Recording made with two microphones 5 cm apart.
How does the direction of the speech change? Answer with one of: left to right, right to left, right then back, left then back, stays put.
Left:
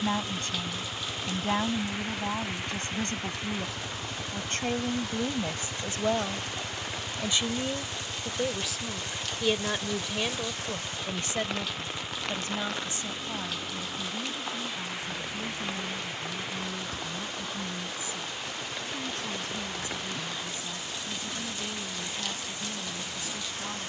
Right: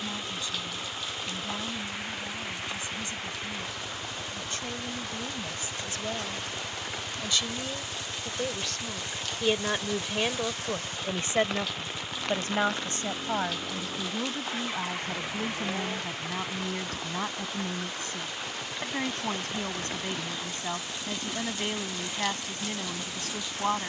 left to right.